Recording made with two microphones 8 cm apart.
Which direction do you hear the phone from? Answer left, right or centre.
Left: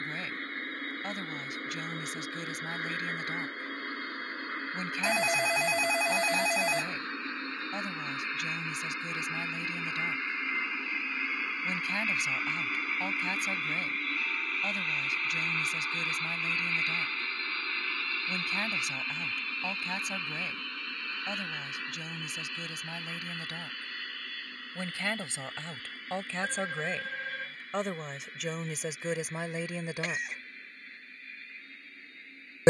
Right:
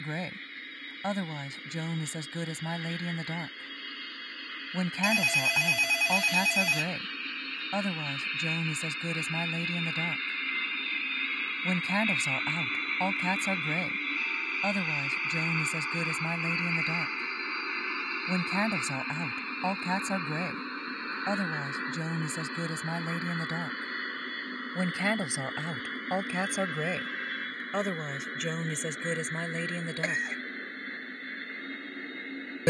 left.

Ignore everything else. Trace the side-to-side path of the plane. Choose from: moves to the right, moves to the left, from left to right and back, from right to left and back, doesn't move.
moves to the right.